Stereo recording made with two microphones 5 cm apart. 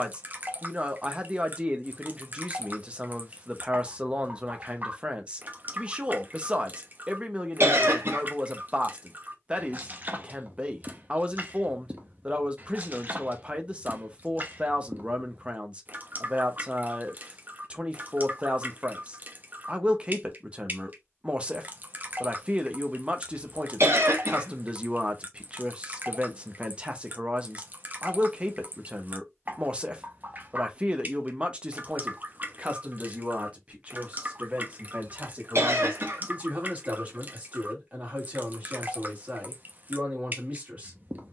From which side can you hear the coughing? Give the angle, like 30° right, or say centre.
60° right.